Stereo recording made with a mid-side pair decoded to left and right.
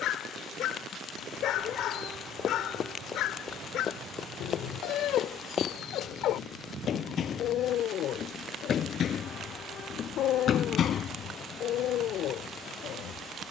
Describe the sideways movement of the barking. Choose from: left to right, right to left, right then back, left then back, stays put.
stays put.